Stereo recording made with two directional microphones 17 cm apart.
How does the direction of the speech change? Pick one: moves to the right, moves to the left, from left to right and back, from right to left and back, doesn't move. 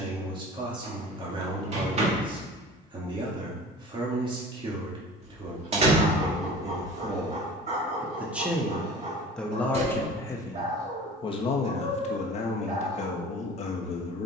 moves to the left.